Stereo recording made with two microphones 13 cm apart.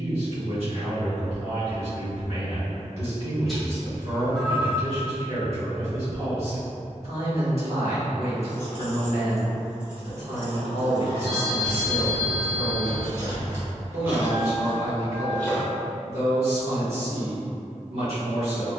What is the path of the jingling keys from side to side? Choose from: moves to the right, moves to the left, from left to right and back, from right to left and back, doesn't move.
from left to right and back.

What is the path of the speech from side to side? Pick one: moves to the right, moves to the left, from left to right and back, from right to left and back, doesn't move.
doesn't move.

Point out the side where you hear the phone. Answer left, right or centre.
centre.